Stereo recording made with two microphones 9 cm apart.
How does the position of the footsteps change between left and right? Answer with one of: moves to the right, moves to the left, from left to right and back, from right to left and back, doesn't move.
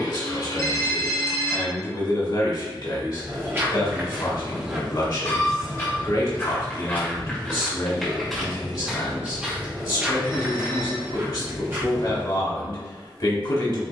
from right to left and back.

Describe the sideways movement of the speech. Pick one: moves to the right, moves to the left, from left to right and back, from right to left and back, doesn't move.
doesn't move.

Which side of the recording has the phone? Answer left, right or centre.
left.